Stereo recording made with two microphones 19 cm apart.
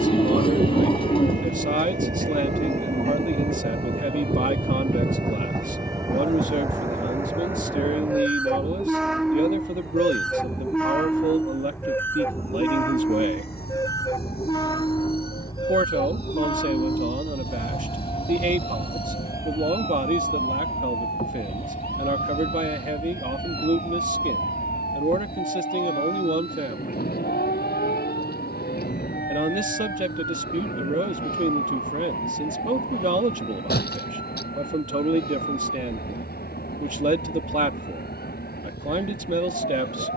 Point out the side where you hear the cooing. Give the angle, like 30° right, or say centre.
30° left.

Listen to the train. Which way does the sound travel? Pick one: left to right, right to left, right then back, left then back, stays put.
right to left.